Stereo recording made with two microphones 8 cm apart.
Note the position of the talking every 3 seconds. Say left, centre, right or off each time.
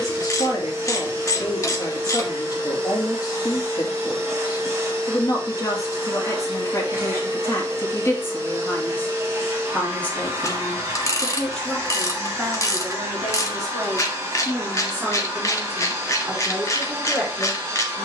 left, left, left, centre, centre, centre.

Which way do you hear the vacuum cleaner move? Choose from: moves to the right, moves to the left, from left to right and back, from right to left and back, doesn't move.
doesn't move.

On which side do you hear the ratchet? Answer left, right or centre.
left.